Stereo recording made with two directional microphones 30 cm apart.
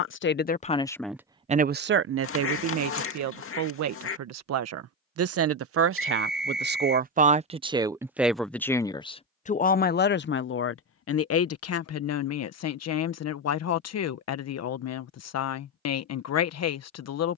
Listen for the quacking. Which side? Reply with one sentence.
You can hear the quacking on the left.